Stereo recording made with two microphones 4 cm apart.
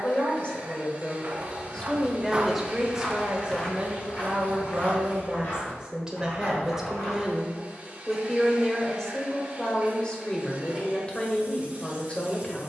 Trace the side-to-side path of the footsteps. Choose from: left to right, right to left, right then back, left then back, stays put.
right to left.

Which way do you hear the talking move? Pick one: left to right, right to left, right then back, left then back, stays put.
right then back.